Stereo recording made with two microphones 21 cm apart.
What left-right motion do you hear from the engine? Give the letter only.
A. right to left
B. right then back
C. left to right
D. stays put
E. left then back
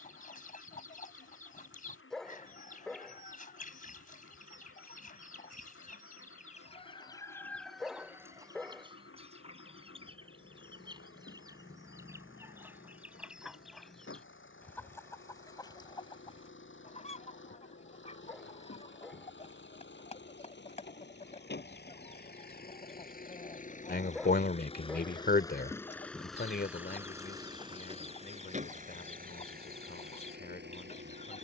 C.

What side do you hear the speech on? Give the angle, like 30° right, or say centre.
50° left.